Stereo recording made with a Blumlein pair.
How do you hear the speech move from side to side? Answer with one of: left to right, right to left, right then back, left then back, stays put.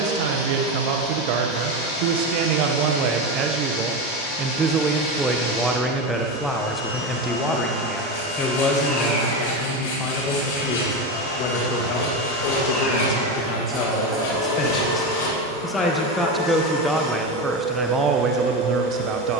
left then back.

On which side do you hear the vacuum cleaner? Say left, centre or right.
left.